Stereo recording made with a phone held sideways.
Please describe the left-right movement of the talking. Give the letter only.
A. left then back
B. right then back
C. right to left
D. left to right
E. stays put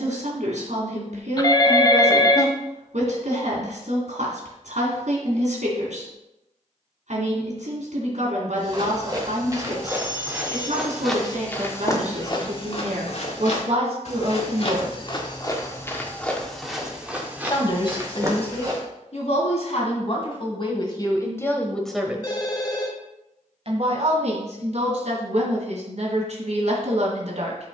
A.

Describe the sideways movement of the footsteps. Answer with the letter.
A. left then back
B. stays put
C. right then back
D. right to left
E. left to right
A.